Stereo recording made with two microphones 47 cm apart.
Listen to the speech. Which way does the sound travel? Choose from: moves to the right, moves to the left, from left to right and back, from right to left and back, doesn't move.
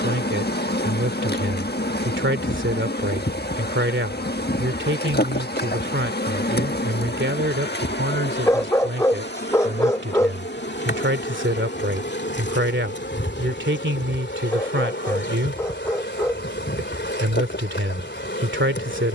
doesn't move.